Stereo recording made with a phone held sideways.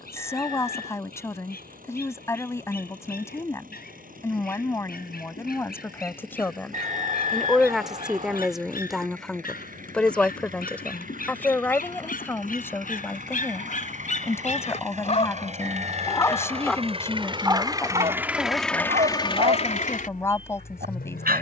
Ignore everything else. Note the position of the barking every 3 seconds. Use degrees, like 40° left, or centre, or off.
80° left, 80° left, 80° left, 70° left, 60° left, 10° left, 50° right.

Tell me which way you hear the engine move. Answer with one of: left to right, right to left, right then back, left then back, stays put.
right to left.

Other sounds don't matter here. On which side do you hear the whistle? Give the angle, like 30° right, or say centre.
50° right.